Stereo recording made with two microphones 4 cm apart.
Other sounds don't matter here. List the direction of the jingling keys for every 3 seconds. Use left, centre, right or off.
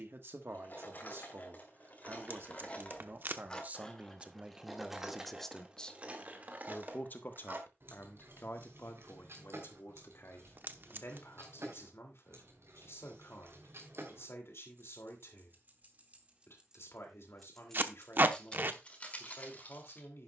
left, centre, right, right, right, right, left.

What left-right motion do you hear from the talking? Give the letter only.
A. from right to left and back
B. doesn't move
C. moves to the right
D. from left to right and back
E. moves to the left
E.